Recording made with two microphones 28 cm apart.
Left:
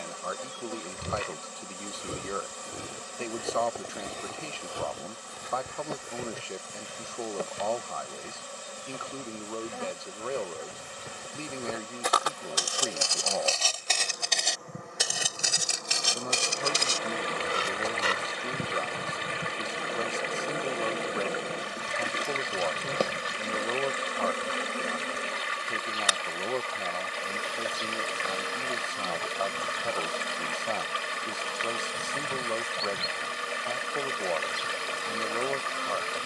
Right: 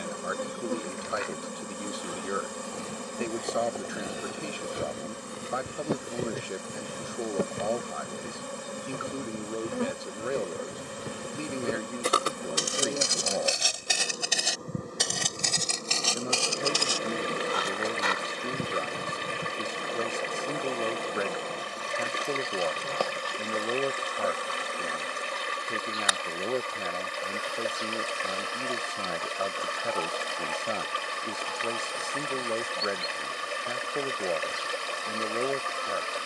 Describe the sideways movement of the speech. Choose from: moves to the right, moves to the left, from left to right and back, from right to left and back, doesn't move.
doesn't move.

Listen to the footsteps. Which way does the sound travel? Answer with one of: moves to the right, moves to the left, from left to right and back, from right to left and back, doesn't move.
from left to right and back.